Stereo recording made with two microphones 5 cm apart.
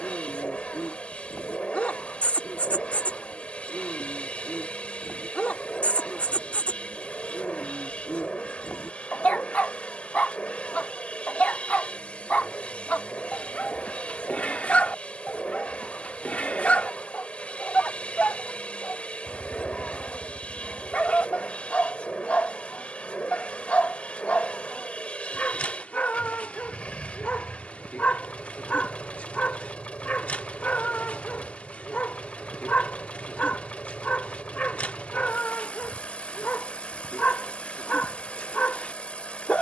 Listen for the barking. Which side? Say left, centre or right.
left.